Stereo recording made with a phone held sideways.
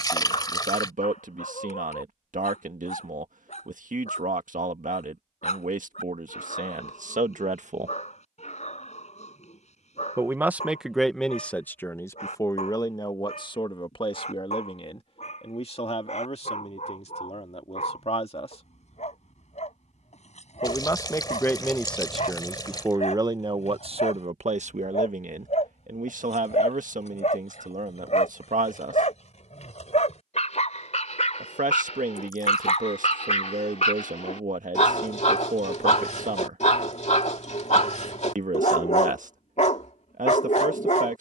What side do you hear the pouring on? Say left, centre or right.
left.